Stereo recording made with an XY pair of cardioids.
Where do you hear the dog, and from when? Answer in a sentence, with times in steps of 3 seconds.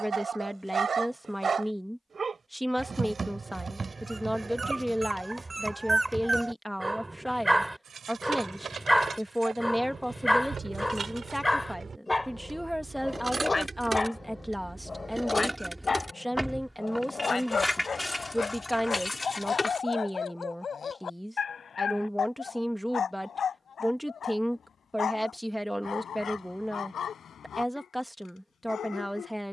In this clip you hear the dog on the right from 0 s, in the centre from 6 s and on the left from 12 s.